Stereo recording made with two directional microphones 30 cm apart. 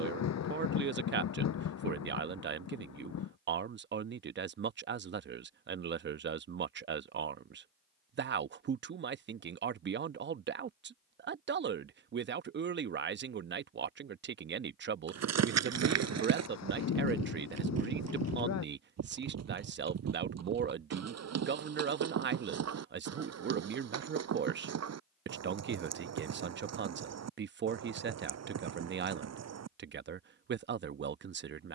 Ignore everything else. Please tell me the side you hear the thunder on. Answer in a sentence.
You can hear the thunder on the left.